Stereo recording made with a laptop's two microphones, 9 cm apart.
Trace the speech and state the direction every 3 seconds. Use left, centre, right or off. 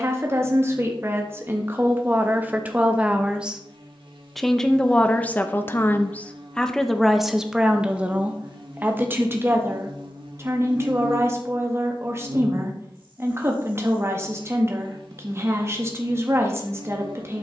right, centre, centre, right, right, right.